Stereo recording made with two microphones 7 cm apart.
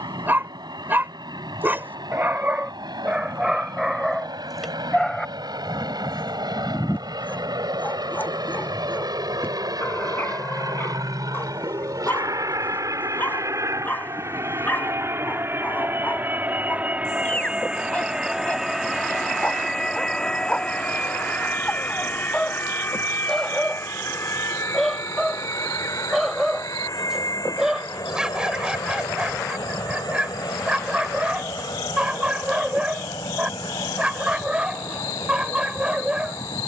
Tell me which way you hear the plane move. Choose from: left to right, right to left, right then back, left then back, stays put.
right to left.